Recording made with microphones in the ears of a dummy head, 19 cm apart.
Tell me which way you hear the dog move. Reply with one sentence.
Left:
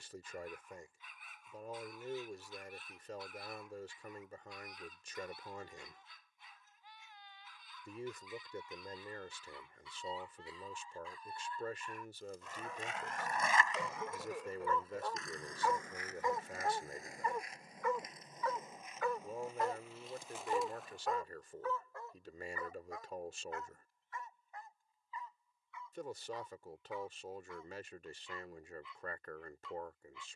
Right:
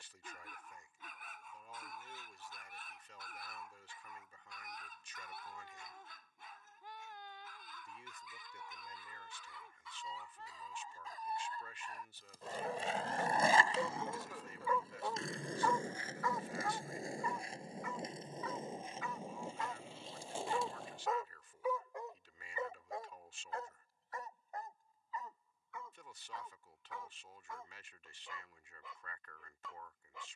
In this clip you hear the dog move from right to left and back again.